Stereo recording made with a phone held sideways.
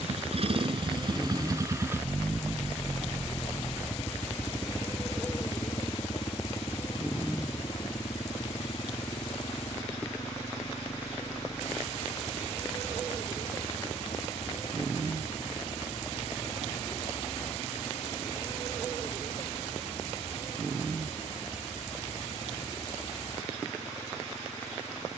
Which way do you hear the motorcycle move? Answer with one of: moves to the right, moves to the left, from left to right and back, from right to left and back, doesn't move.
moves to the left.